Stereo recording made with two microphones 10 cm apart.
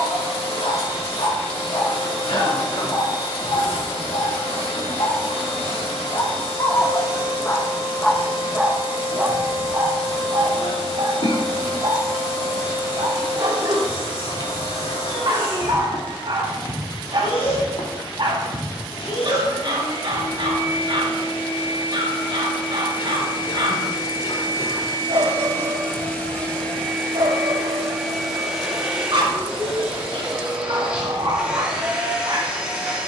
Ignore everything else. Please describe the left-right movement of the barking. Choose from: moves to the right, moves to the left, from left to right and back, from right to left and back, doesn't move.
moves to the right.